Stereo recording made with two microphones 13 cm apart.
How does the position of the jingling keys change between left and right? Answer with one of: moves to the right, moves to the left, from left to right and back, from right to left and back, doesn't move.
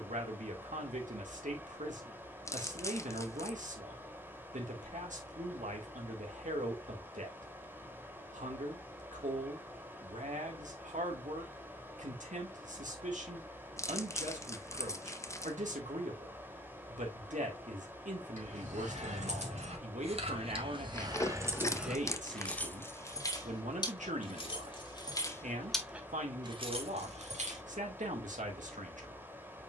from right to left and back.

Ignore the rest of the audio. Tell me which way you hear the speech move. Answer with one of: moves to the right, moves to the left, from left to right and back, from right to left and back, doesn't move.
doesn't move.